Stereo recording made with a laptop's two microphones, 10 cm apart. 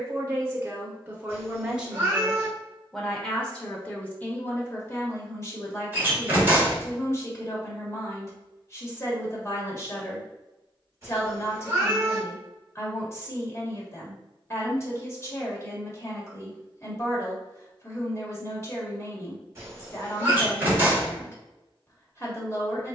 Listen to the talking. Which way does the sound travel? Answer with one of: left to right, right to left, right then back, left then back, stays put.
right to left.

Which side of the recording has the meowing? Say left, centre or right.
right.